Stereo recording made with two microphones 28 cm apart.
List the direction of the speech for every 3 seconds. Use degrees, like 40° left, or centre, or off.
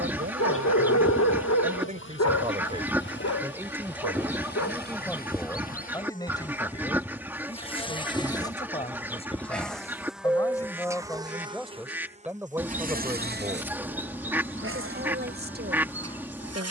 30° right, centre, 20° left, 10° left, 20° right, 40° right.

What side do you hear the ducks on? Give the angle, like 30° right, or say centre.
10° right.